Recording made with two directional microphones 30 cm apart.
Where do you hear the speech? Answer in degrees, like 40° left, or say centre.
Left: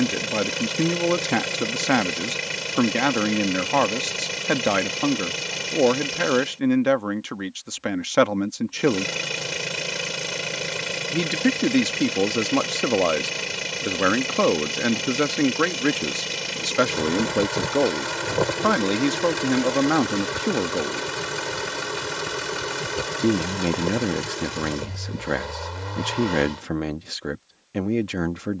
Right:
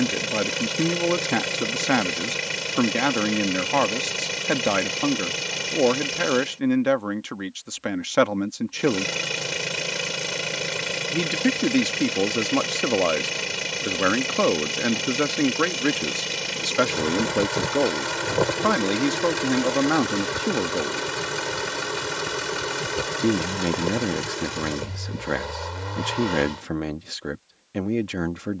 10° left.